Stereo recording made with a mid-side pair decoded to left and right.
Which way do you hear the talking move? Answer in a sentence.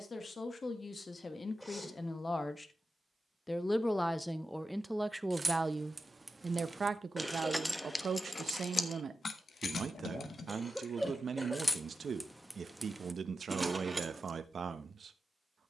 In this clip you hear the talking move to the right.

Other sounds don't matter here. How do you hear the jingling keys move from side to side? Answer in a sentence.
You can hear the jingling keys move from right to left and back again.